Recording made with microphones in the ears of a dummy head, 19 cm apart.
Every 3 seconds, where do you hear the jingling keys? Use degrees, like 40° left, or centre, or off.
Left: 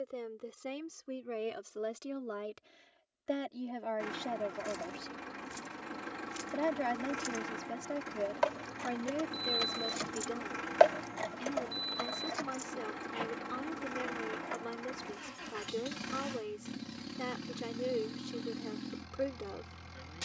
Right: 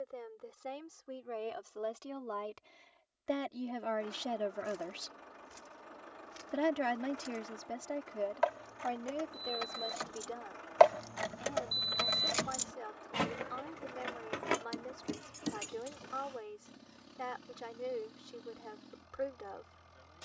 off, 70° left, 60° left, 20° left, 60° right, 80° right, off.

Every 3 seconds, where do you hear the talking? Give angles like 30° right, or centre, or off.
30° left, 10° right, 10° left, 40° left, 40° left, 40° left, 40° left.